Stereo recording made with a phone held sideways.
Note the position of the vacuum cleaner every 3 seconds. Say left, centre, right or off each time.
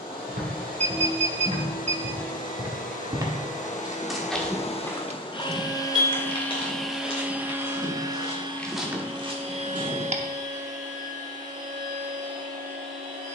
left, left, centre, right, right.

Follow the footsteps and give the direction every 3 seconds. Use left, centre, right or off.
right, centre, left, right, off.